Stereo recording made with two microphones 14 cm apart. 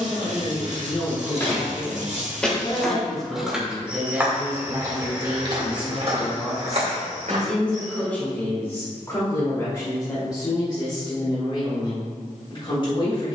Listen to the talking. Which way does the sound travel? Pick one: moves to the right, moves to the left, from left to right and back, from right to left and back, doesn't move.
from left to right and back.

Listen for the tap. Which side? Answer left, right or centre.
right.